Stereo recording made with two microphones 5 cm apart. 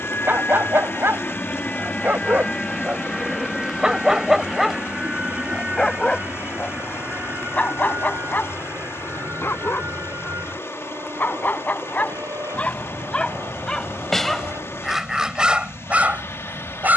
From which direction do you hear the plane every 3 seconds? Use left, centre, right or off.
left, centre, right, right, right, right.